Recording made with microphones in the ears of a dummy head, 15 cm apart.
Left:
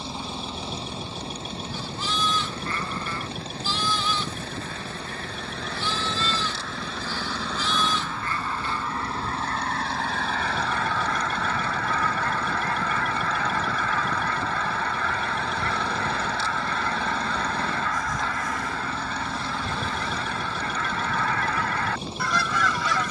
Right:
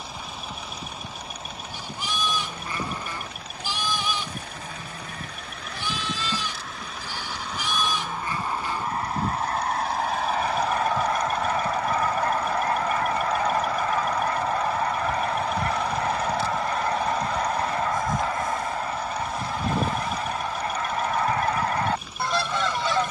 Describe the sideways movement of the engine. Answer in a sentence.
You can hear the engine stay put.